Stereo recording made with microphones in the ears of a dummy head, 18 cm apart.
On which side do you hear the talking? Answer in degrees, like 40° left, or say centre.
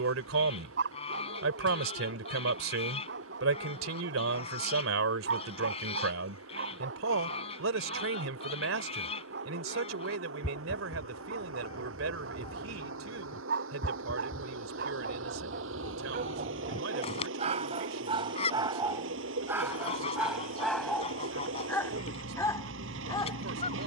70° right.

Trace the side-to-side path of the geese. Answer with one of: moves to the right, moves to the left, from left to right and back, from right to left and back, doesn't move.
doesn't move.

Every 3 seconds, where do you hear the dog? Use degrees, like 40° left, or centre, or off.
60° right, 60° right, 60° right, 60° right, 60° right, 40° right, 10° right, 10° left.